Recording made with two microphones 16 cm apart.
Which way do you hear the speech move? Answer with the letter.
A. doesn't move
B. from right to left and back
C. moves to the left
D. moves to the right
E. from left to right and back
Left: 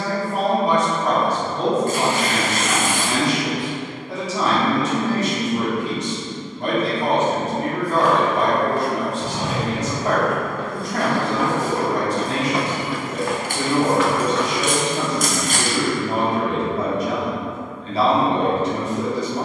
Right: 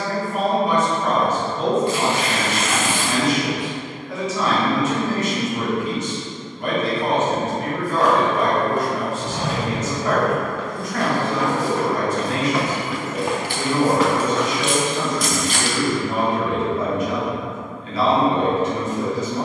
A.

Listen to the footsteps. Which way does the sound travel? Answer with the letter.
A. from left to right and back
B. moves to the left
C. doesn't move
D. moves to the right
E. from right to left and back
E.